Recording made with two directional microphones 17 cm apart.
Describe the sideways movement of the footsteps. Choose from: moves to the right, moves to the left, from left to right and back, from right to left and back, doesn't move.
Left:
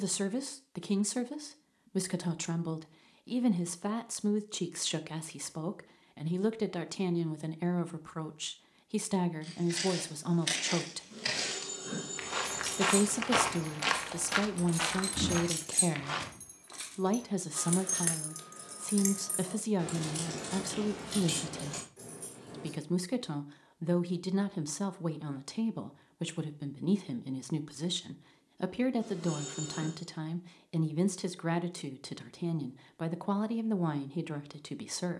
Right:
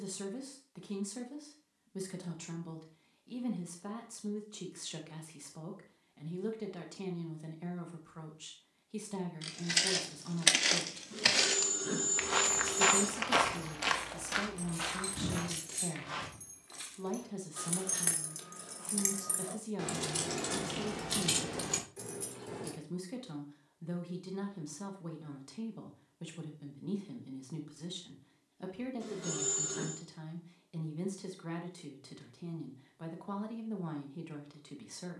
moves to the left.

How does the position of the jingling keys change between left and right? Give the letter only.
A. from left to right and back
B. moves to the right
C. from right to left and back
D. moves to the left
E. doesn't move
B.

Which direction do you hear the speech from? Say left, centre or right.
left.